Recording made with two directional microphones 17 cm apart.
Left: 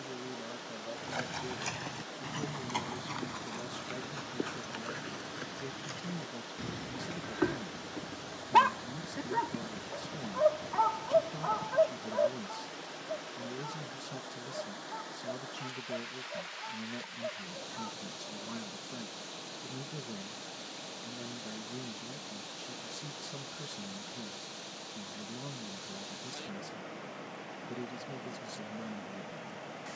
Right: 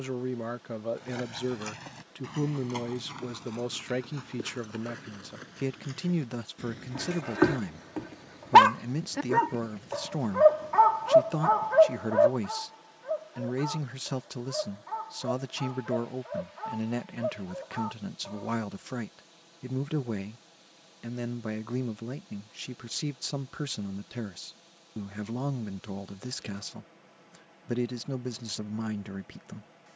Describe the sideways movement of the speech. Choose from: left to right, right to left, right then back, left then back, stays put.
stays put.